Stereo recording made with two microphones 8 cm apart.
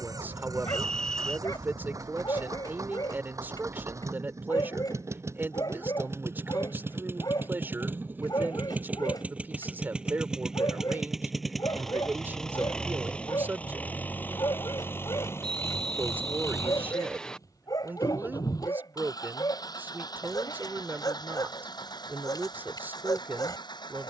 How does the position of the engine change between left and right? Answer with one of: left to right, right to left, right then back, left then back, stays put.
right to left.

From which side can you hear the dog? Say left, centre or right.
left.